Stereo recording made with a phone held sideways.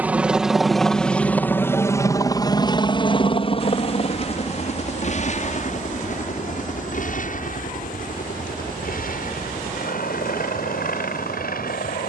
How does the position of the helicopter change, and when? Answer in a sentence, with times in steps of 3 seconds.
You can hear the helicopter in the centre from 0 s and on the left from 3 s.